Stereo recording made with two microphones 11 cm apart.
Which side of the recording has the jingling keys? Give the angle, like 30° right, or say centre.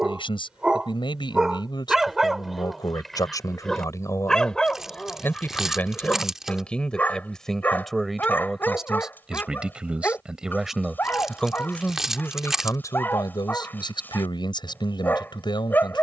10° right.